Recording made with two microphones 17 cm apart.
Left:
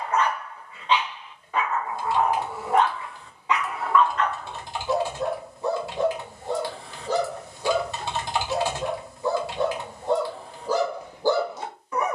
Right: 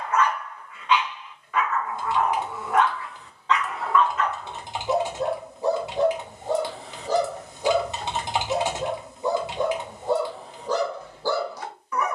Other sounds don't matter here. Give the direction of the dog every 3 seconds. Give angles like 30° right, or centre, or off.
30° left, 10° right, 40° right, centre.